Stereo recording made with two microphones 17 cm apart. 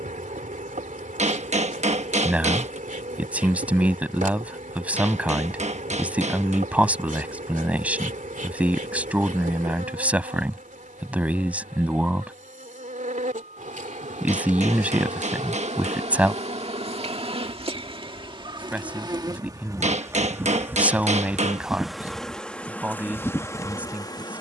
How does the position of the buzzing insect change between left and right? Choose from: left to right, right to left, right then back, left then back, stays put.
right to left.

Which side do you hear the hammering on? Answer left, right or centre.
right.